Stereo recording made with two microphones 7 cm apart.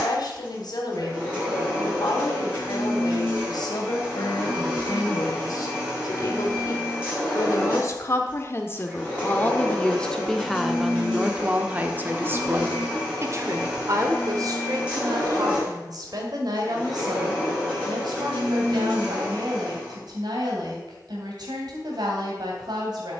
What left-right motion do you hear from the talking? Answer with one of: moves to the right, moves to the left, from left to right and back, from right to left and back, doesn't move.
moves to the right.